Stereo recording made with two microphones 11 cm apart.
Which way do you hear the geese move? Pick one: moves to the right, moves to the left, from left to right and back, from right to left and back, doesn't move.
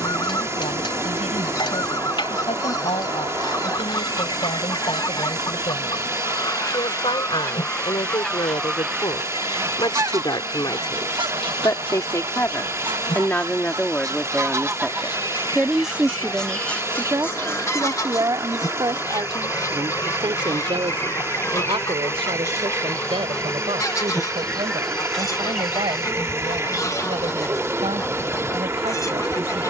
from left to right and back.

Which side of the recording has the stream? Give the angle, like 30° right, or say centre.
30° right.